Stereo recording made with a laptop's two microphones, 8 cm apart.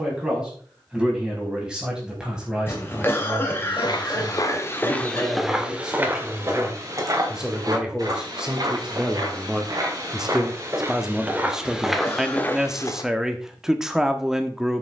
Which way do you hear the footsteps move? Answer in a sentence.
In this clip you hear the footsteps move from left to right and back again.